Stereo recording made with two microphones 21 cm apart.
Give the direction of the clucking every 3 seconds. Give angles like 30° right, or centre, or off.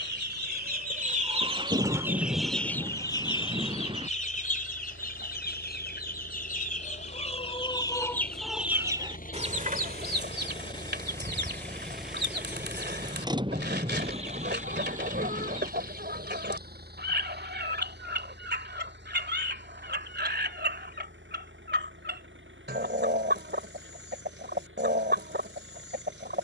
20° right, 40° left, 20° left, 50° right, 50° right, 50° right, 50° right, 50° right, 50° right.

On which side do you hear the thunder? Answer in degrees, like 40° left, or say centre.
20° right.